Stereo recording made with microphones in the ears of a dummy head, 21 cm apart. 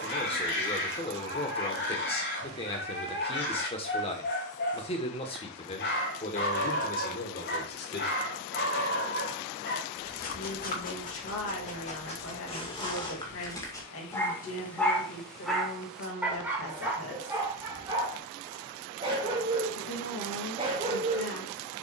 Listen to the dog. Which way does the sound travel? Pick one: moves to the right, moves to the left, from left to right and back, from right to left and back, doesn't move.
moves to the right.